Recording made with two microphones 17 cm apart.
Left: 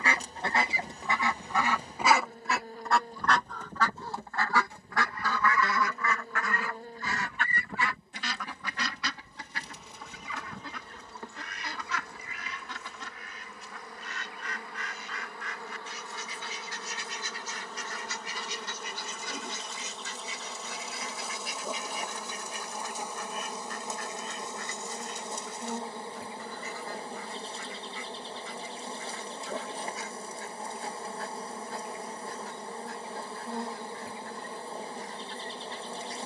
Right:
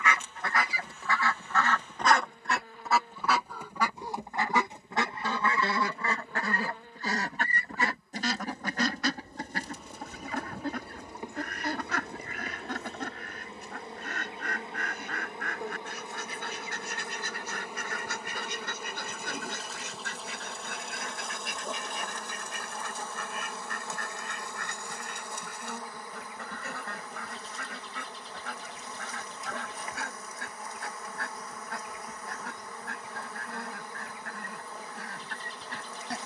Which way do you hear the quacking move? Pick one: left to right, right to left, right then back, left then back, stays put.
left to right.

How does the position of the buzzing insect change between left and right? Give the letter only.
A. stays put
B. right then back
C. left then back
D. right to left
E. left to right
B.